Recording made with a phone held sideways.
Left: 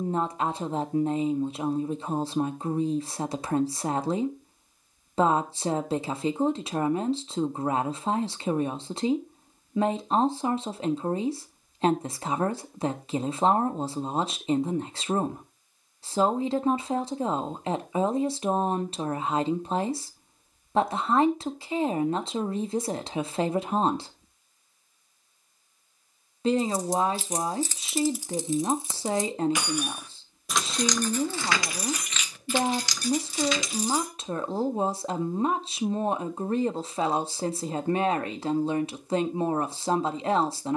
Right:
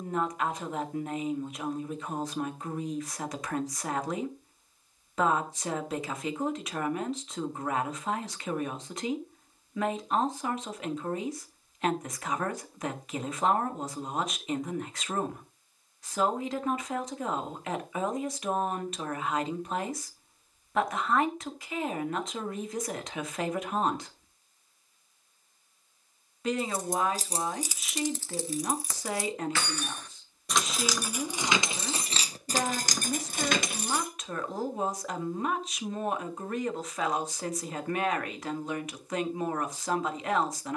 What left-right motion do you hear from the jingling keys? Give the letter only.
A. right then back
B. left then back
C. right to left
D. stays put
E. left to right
B.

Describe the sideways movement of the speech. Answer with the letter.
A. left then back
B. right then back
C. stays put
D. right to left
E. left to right
C.